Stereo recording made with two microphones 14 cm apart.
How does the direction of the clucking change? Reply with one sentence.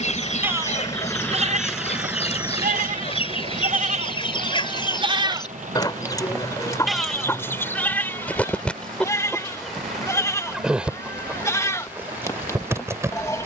In this clip you hear the clucking move to the right.